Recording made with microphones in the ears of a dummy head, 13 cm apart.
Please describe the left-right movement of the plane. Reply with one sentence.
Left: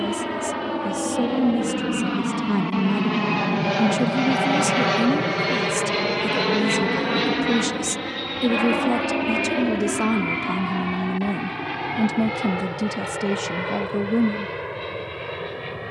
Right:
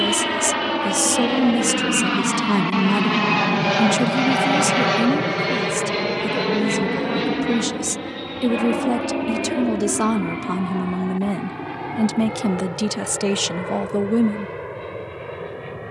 You can hear the plane move from right to left.